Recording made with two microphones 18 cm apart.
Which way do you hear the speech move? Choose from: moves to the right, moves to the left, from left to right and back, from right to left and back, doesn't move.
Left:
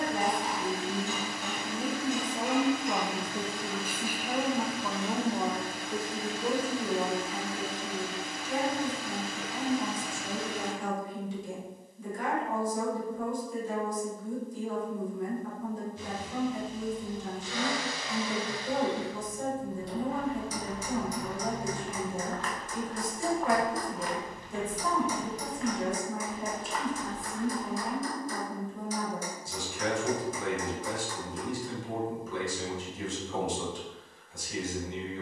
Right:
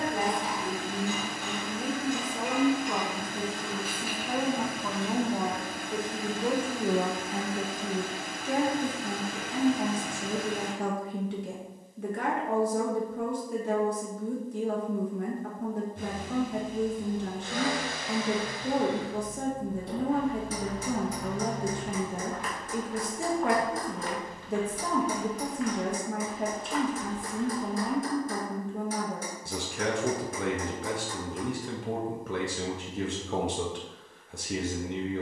moves to the right.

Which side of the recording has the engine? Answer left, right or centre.
right.